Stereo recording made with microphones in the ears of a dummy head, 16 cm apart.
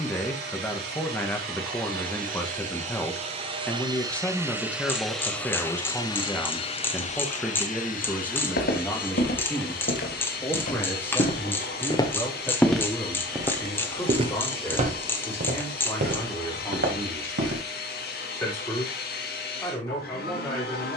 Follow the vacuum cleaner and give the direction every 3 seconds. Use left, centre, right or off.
right, centre, left, left, left, left, left.